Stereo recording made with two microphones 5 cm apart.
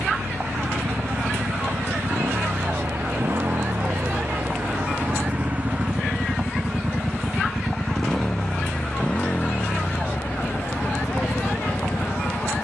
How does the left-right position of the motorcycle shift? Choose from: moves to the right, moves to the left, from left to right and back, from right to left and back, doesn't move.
moves to the left.